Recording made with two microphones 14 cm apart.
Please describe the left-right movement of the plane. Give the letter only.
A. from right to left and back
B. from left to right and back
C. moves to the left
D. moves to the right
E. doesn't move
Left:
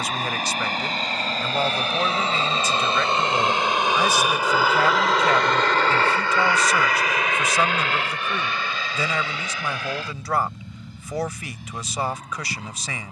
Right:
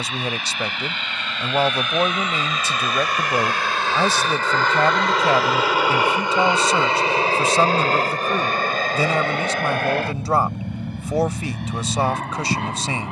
D.